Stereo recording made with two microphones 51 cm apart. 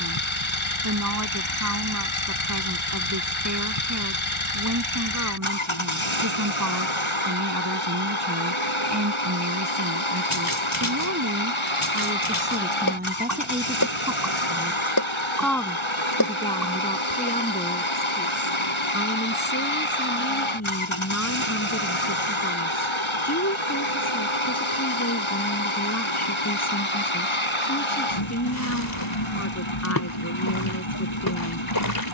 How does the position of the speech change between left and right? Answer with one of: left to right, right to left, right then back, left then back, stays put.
right to left.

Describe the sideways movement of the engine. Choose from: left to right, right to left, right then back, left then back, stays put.
stays put.